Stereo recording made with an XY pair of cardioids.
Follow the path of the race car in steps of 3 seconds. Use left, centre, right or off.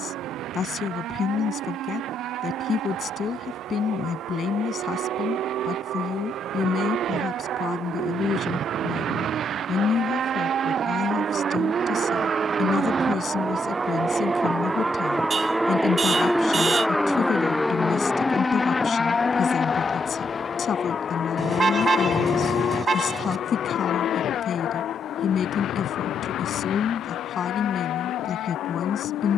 right, right, right, right, right, centre, left, left, left, left.